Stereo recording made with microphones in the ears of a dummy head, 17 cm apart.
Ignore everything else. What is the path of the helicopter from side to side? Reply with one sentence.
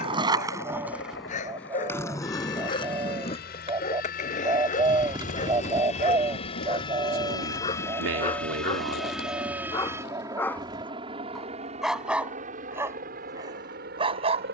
You can hear the helicopter move from left to right.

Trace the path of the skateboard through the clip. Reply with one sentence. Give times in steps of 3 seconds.
In this clip you hear the skateboard in the centre from 0 s, on the left from 3 s and not at all from 12 s.